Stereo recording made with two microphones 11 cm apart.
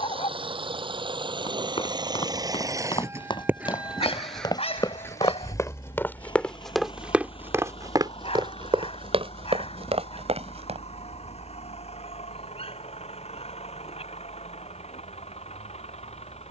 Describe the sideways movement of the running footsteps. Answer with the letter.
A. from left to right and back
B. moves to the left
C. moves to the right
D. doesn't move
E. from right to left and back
C.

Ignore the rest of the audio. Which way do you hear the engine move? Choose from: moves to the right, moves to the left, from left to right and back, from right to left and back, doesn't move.
moves to the left.